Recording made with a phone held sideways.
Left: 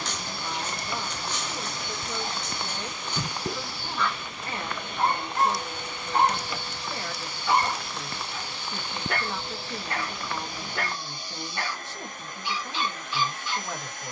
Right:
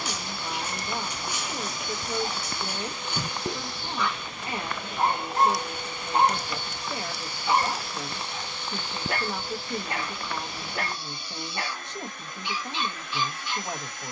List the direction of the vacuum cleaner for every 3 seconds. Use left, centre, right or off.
left, centre, centre, left, left.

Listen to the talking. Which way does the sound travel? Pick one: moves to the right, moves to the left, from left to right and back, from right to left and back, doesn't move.
doesn't move.